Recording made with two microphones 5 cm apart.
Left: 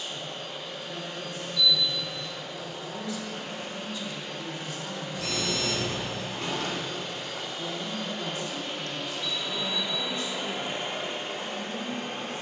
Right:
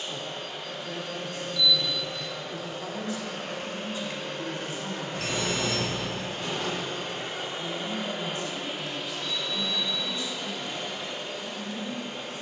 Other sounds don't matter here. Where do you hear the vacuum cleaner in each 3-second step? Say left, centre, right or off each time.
right, right, right, left.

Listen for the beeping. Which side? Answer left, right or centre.
right.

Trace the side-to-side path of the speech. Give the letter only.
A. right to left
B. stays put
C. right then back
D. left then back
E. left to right
A.